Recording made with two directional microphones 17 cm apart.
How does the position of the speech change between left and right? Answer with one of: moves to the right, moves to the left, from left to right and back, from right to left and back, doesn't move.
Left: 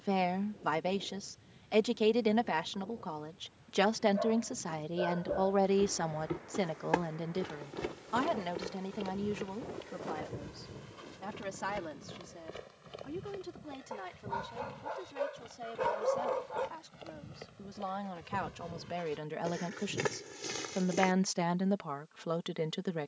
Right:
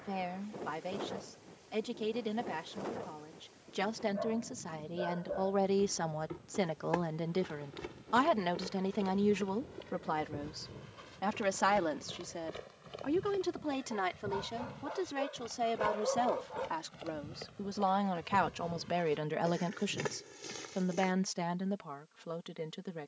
from left to right and back.